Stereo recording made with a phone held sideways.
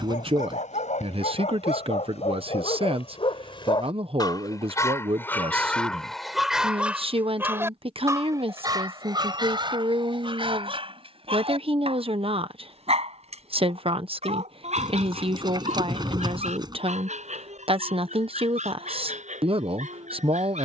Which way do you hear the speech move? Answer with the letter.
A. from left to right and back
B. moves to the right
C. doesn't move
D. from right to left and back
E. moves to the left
C.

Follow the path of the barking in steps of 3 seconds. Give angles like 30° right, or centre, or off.
60° left, 30° left, 10° right, 40° right, 50° right, 60° right, 60° right.